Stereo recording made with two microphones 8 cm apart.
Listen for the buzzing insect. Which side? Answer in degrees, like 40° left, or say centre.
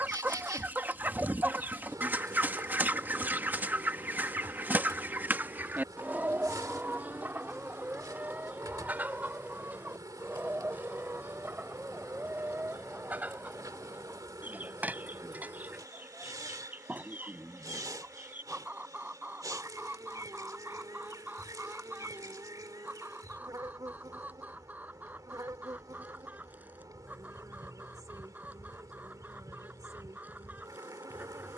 50° right.